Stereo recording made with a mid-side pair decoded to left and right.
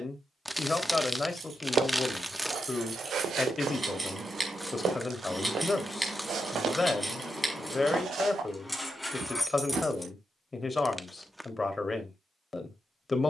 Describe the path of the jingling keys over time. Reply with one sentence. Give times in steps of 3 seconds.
You can hear the jingling keys on the right from 0 s, in the centre from 6 s and not at all from 12 s.